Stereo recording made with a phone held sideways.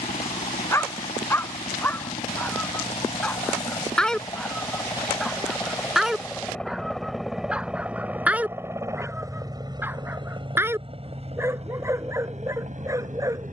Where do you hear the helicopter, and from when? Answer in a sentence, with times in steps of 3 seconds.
You can hear the helicopter on the left from 0 s, in the centre from 6 s and on the right from 9 s.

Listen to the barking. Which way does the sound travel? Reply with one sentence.
You can hear the barking move from left to right.